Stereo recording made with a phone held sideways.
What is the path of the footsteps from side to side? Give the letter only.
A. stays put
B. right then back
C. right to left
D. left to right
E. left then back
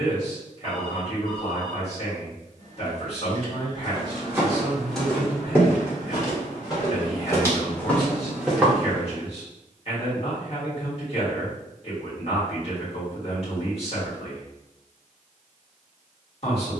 E.